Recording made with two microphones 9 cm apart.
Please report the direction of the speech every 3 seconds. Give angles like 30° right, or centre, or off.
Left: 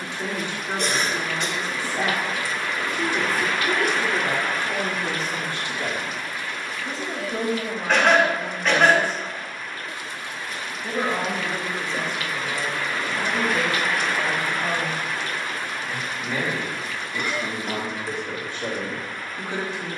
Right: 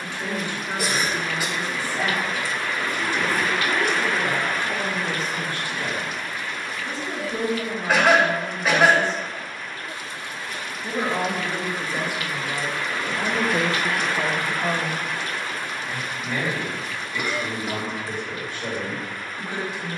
30° left, 30° left, 20° left, centre, 20° right, 10° left, 30° left.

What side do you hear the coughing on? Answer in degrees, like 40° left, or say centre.
10° right.